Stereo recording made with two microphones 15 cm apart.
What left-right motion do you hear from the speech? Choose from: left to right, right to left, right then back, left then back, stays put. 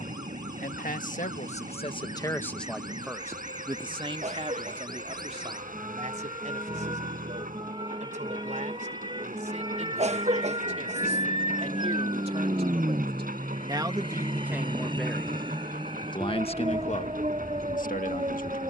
right then back.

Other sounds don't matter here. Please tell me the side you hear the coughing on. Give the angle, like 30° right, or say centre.
50° right.